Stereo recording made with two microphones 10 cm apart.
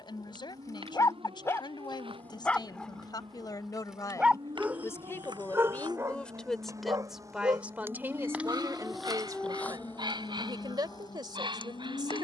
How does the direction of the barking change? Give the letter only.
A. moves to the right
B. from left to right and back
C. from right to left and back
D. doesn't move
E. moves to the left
A.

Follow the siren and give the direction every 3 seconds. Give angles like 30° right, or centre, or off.
60° right, 50° right, 30° right, 30° left.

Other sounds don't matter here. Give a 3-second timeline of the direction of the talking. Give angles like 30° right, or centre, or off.
50° left, 30° left, 10° right, 40° right.